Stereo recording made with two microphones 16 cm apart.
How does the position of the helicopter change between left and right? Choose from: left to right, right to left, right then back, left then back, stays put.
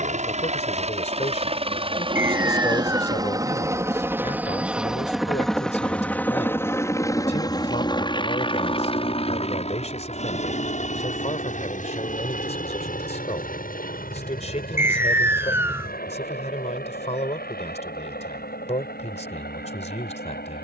right to left.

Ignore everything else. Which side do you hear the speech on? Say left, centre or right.
left.